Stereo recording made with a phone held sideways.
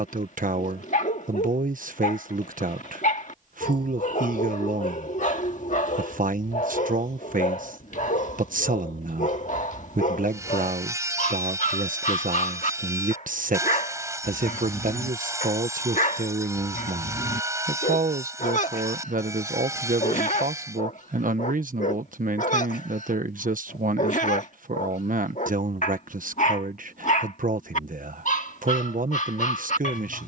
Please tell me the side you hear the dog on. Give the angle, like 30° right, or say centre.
60° left.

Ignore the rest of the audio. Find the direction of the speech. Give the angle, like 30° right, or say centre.
70° right.